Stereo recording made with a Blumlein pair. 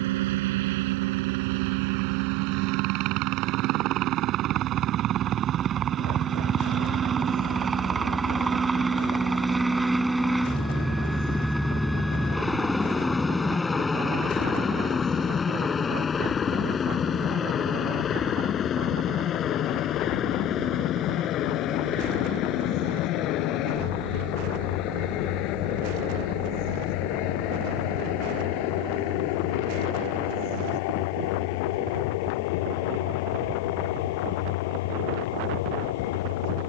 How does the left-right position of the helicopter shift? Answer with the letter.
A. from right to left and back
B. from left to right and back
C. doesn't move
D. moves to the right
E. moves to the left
E.